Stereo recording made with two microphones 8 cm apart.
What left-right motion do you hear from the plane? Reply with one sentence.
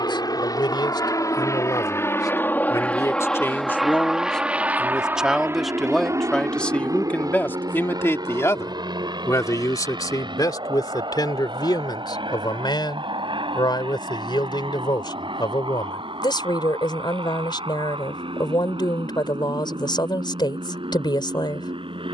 In this clip you hear the plane travel towards the right.